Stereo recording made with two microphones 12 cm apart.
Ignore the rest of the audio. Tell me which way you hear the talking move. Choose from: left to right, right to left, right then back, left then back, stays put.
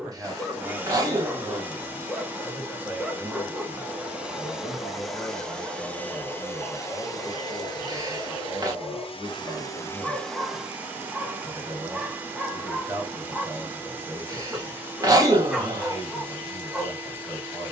left then back.